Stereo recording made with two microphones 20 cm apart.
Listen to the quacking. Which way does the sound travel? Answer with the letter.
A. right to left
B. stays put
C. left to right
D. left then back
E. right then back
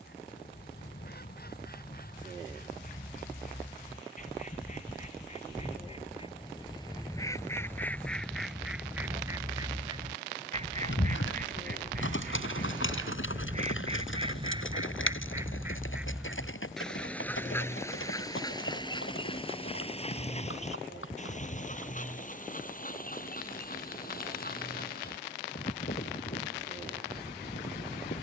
E.